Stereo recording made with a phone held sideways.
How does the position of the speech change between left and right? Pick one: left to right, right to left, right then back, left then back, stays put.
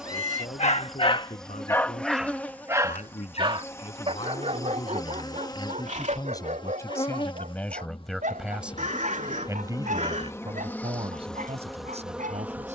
left to right.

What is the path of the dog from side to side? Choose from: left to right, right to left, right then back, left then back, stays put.
left to right.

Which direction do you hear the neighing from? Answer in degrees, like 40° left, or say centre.
60° right.